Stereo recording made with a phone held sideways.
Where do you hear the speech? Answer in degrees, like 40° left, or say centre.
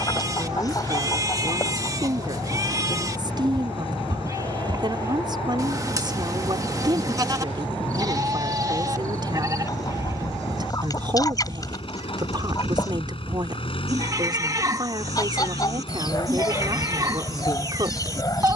30° right.